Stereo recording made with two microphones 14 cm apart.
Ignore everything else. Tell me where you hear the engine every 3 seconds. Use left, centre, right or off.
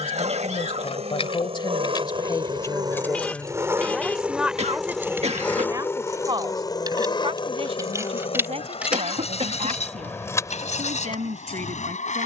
right, centre, left, left.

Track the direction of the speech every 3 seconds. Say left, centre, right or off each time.
left, centre, right, right.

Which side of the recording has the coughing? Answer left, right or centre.
right.